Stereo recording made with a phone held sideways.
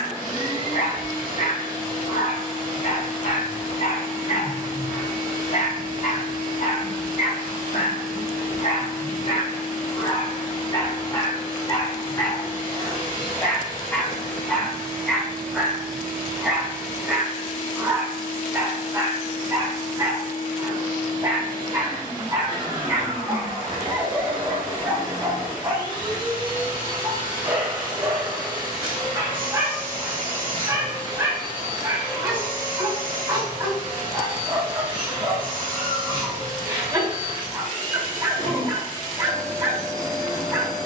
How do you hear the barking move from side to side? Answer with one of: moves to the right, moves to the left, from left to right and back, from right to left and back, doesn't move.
moves to the right.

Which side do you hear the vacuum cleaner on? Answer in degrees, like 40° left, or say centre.
40° right.